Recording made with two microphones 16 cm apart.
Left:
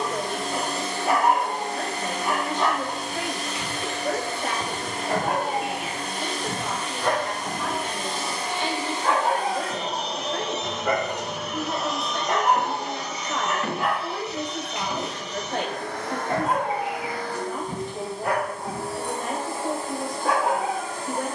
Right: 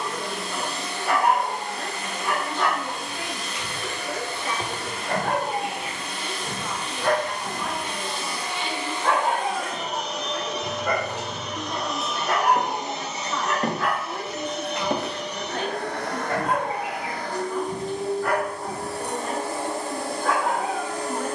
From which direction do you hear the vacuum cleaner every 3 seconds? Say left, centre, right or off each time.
left, left, left, left, right, right, right.